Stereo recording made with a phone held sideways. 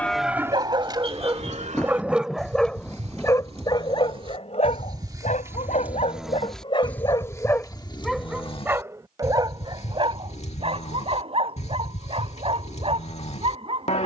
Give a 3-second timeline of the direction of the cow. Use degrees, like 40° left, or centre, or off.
40° right, 30° right, 20° left, 50° left, 50° left.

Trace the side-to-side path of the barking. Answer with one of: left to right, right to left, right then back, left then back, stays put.
left then back.